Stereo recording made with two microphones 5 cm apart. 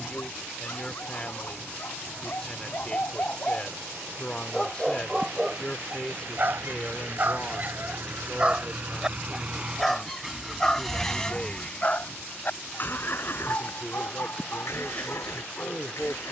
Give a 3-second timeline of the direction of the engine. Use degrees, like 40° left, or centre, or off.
70° right, 70° right, 50° right, centre, 50° left, 70° left.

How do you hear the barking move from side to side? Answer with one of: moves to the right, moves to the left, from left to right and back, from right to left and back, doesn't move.
from left to right and back.